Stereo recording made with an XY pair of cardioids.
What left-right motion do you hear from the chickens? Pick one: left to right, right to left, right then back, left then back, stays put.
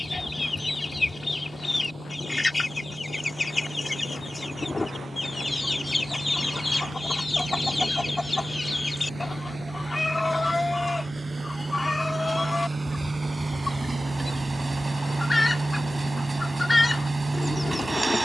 stays put.